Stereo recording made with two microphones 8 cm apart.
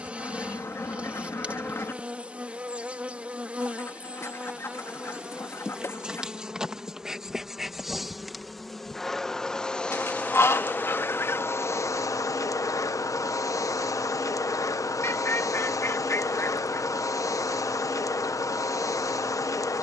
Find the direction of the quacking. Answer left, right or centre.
left.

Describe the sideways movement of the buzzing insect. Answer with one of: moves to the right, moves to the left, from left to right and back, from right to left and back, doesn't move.
moves to the left.